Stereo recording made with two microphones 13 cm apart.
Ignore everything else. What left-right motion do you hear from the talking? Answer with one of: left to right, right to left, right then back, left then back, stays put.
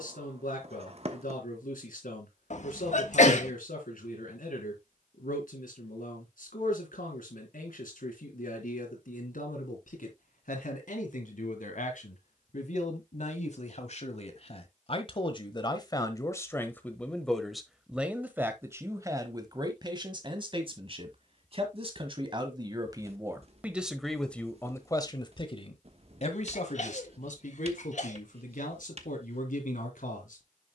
right then back.